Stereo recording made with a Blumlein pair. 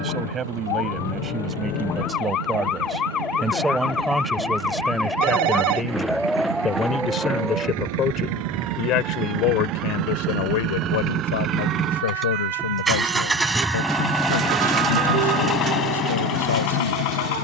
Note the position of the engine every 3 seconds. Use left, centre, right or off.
right, right, right, right, centre, left.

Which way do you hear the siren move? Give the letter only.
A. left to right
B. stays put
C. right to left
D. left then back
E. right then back
A.